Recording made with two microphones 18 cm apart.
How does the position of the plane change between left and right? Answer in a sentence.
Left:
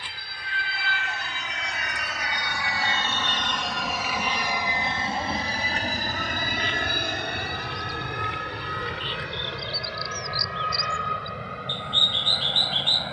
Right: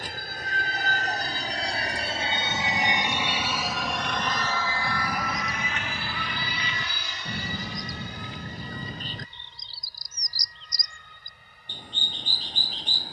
You can hear the plane go from the right side to the left.